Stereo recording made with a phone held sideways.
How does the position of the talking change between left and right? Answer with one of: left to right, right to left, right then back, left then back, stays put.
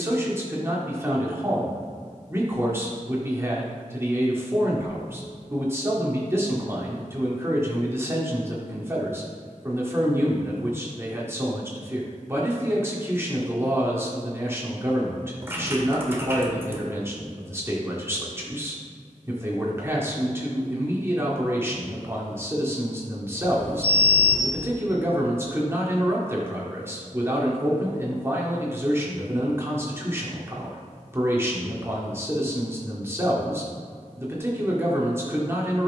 stays put.